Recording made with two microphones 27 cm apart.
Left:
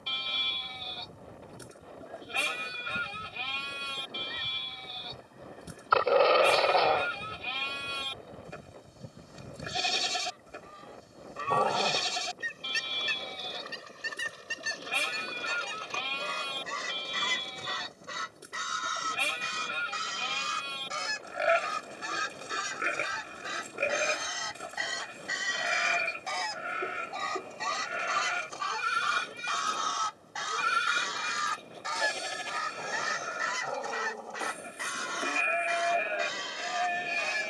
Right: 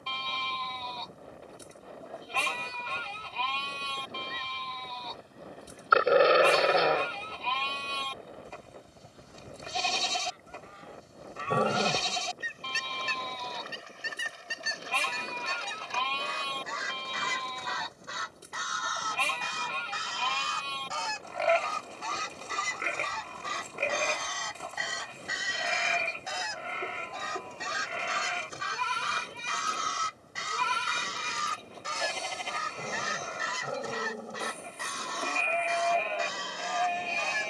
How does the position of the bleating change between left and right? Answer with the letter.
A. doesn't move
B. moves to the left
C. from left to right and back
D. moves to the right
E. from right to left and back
A.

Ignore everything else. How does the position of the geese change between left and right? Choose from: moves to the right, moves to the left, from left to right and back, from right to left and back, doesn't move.
moves to the right.